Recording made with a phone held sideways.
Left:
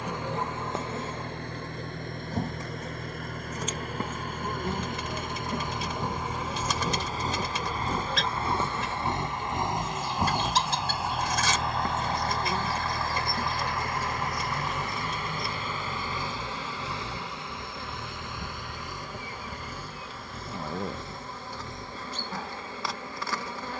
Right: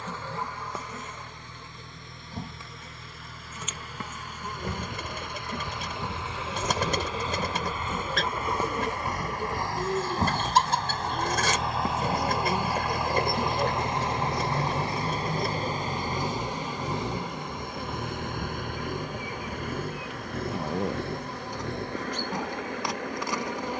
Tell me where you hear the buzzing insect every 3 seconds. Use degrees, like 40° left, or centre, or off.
30° left, 30° left, centre, 20° right, 20° right, 20° right, 20° right, 20° right.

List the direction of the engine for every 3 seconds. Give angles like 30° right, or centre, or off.
60° left, 50° left, 40° left, 10° left, 20° right, 40° right, 60° right, 70° right.